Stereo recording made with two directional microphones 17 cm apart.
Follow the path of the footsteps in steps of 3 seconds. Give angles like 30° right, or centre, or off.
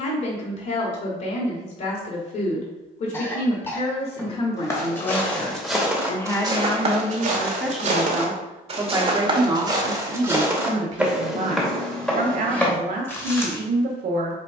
off, 10° left, 40° right, 10° right, 10° left.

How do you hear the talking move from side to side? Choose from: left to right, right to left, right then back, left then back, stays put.
left to right.